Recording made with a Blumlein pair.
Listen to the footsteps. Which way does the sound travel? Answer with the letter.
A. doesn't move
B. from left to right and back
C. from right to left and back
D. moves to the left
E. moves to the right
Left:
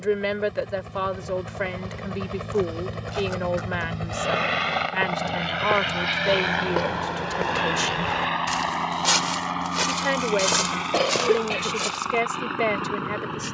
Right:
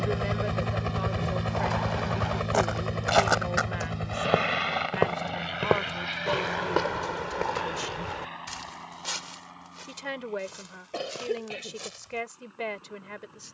D.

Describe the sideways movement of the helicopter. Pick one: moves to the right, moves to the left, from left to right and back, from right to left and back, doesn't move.
moves to the left.